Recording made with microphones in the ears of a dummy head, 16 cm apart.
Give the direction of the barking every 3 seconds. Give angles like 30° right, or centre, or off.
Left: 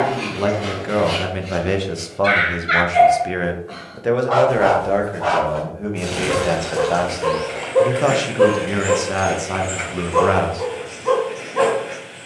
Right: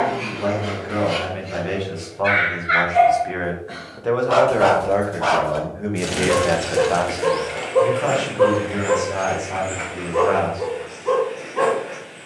60° left, 30° right, centre, 60° left.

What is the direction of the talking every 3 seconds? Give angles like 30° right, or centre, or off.
60° left, 10° left, 30° left, 70° left.